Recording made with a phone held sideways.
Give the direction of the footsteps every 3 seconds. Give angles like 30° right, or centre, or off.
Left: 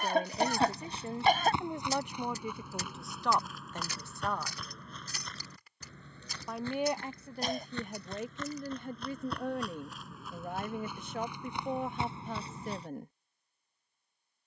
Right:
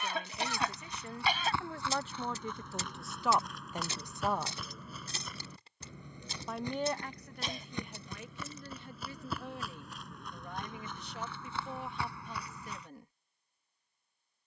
20° left, centre, 10° right, 10° left, 30° left.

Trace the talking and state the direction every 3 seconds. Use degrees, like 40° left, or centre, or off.
20° left, 10° right, 30° left, 50° left, 50° left.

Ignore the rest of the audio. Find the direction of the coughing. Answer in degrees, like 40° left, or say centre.
50° left.